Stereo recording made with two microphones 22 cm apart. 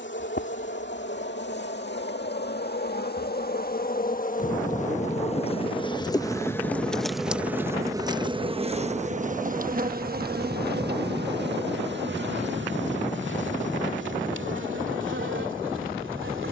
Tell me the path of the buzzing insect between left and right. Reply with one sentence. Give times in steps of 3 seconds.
In this clip you hear the buzzing insect on the left from 0 s, in the centre from 6 s and on the right from 9 s.